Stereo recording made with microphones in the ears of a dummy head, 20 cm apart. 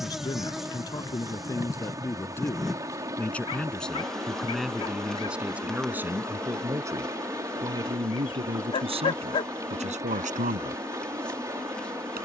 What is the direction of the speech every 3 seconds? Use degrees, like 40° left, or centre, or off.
10° left, centre, 20° right, 30° right.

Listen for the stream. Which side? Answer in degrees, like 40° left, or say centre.
10° right.